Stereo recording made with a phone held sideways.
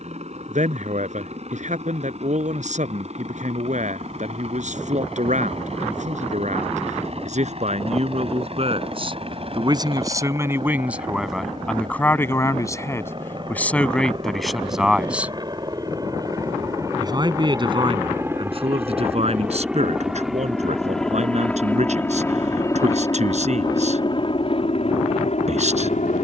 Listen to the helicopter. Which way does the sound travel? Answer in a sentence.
In this clip you hear the helicopter move to the left.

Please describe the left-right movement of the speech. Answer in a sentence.
In this clip you hear the speech go left and come back.